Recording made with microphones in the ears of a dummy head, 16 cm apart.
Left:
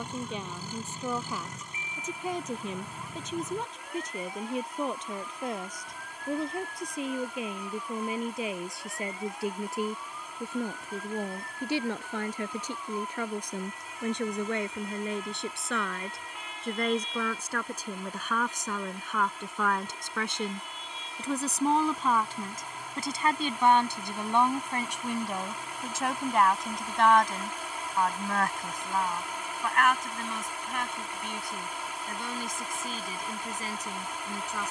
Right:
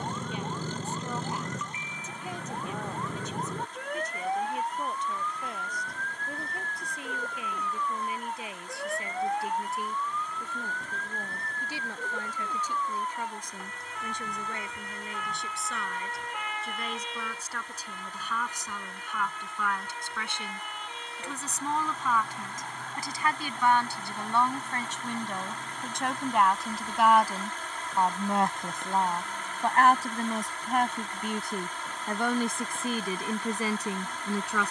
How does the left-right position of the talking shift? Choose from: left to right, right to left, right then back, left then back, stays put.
left to right.